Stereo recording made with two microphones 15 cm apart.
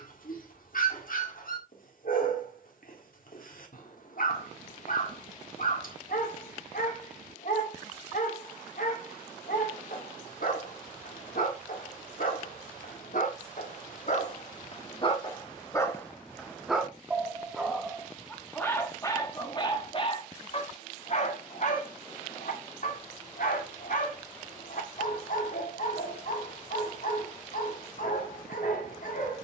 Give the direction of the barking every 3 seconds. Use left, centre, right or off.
left, left, left, left, left, centre, left, left, left, left.